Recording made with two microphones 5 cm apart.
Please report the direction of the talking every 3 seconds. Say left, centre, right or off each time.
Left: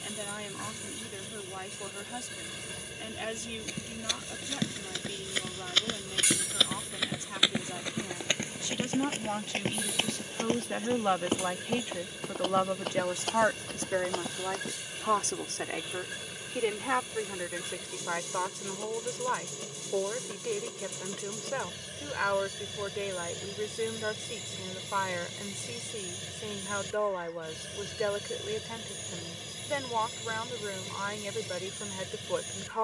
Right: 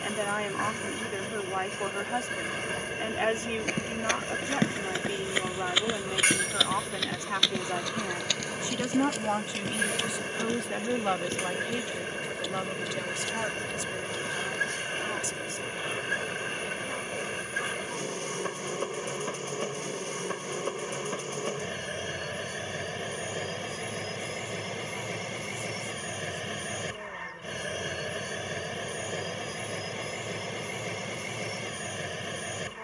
right, right, right, centre, left, left, left, left, left, left, left.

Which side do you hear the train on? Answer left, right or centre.
right.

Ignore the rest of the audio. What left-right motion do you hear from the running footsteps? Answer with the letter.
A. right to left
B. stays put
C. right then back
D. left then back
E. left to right
A.